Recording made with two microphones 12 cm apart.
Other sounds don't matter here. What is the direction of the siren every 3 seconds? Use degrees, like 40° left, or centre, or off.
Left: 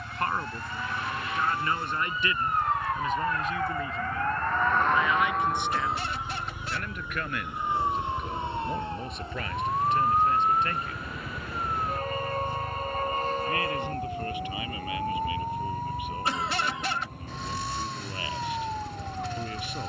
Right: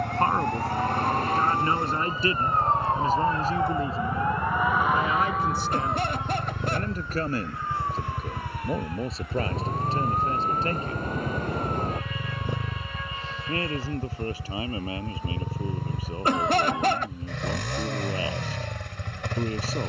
40° right, 10° right, 20° left, 30° left, 40° left, 50° left, 50° left.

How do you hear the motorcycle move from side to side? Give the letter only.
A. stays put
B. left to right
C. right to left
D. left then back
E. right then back
A.